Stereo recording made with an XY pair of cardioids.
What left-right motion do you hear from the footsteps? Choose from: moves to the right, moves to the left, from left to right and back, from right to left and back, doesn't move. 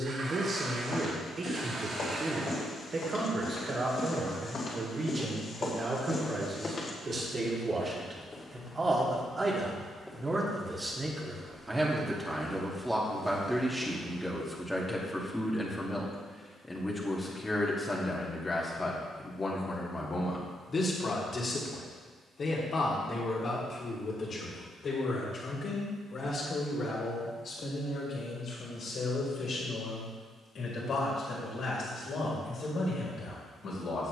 moves to the right.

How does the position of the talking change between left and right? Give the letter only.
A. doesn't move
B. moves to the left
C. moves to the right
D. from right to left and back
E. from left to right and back
B.